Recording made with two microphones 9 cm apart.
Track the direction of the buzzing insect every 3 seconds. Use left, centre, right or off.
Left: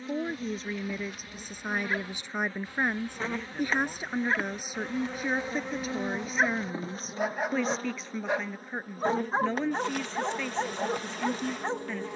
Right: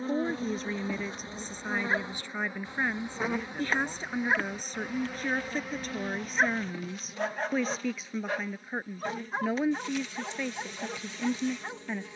right, centre, left, left.